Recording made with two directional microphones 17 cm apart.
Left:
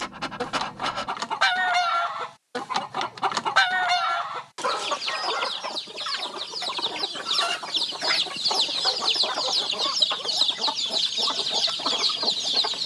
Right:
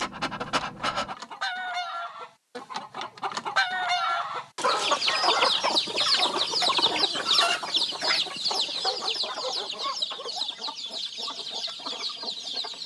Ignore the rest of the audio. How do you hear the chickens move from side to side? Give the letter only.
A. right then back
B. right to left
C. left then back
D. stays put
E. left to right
A.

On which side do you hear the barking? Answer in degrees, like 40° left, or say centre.
10° right.